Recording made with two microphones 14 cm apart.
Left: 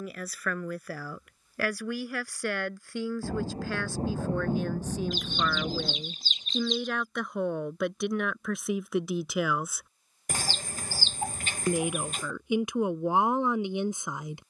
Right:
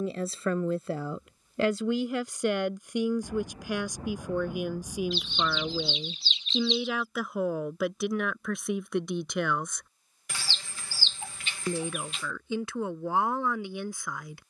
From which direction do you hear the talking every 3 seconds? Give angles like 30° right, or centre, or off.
20° right, 10° right, centre, 10° left, 20° left.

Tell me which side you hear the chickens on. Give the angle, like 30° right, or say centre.
50° left.